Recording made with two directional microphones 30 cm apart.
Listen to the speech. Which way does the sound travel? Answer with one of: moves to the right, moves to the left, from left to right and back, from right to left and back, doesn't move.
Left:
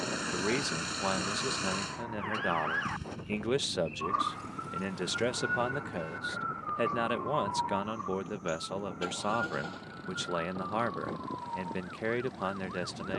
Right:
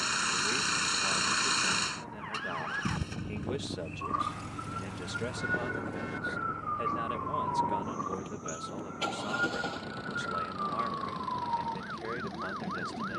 doesn't move.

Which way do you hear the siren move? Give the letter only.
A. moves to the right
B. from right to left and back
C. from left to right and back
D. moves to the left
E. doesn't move
A.